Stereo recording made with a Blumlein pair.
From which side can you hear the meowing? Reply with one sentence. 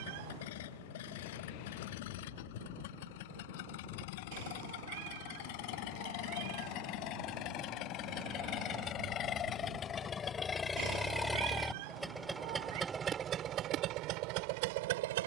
In this clip you hear the meowing on the right.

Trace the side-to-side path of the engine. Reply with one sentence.
In this clip you hear the engine go from the left side to the right.